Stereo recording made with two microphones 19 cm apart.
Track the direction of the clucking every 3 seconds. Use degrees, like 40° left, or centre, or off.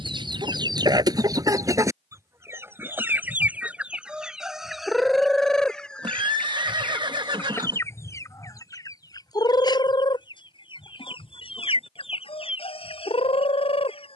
20° right, centre, 10° left, 30° left, 30° left.